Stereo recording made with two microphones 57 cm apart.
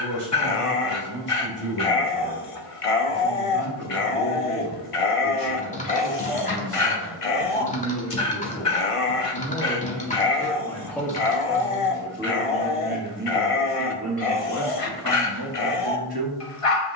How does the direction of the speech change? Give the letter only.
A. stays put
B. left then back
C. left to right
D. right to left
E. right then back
C.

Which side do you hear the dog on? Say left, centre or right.
left.